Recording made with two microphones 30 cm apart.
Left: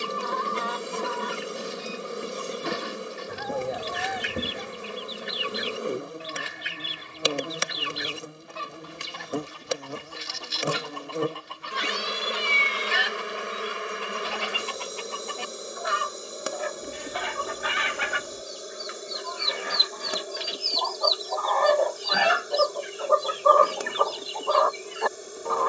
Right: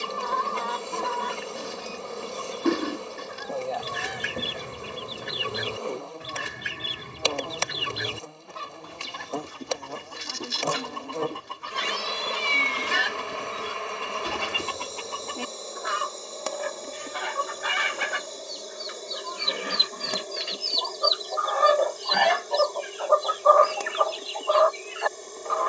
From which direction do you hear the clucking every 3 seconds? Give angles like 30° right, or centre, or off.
60° right, 60° right, 60° right, 60° right, 60° right, 50° right, 40° right, 10° left, 50° left.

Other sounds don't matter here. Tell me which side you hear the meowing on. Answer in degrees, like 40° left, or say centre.
70° left.